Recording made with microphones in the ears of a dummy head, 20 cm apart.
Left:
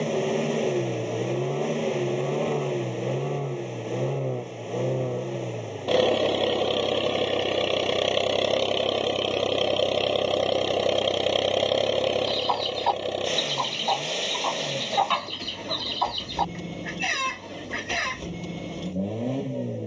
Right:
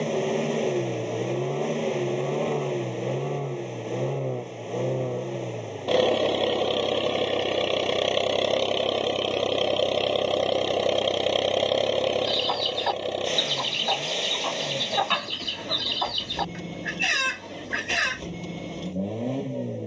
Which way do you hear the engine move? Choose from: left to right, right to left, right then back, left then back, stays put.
stays put.